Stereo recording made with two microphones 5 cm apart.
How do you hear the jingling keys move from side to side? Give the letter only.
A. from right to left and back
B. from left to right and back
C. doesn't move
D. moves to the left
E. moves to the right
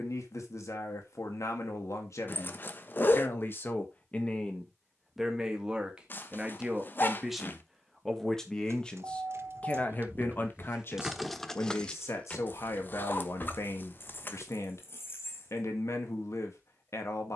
D.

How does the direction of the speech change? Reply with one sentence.
You can hear the speech go right and come back.